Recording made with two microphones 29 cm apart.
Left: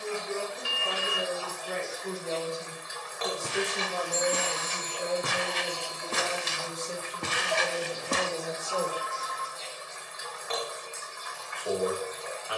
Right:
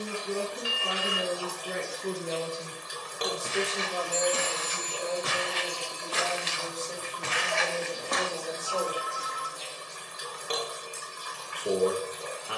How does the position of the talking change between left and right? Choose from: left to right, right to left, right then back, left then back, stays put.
left then back.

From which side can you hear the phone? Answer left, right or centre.
left.